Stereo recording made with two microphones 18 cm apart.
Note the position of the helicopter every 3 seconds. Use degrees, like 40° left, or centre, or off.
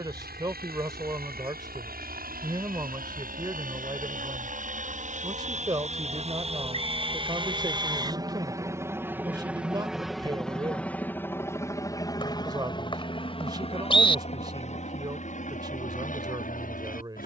60° right, 50° right, 30° right, centre, 30° left, 50° left.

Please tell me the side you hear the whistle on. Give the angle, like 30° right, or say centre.
30° left.